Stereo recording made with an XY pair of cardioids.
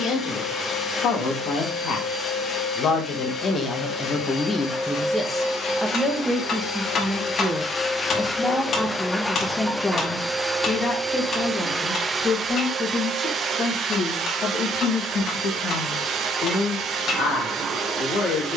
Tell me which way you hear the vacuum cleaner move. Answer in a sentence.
In this clip you hear the vacuum cleaner go from the left side to the right.